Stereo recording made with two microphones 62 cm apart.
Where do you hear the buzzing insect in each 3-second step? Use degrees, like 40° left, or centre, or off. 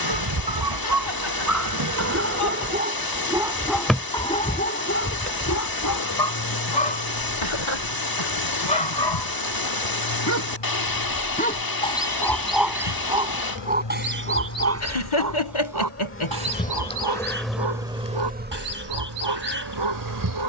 30° right, 10° left, 40° left, 50° left, 40° left, 10° left, 30° right.